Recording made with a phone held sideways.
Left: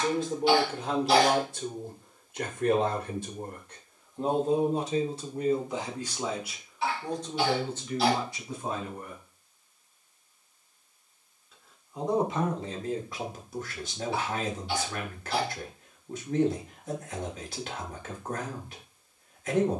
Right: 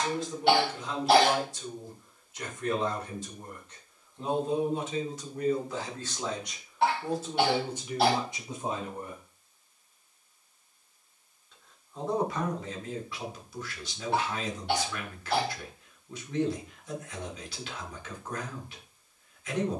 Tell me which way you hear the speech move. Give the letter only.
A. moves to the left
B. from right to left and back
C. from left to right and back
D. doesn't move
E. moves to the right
C.